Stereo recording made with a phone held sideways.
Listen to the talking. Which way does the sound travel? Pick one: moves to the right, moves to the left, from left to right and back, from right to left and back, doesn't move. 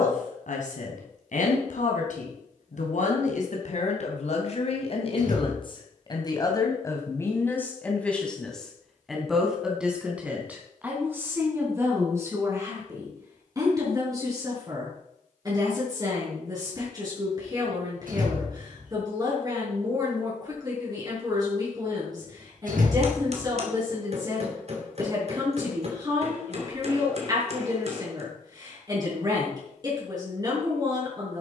moves to the right.